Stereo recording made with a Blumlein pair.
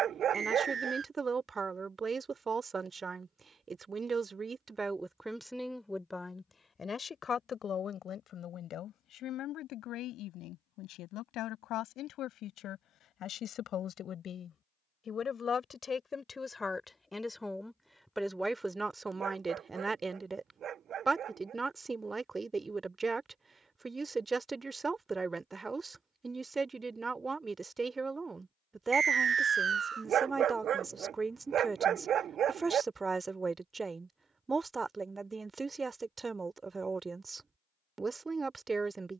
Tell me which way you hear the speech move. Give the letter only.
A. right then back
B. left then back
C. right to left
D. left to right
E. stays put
B.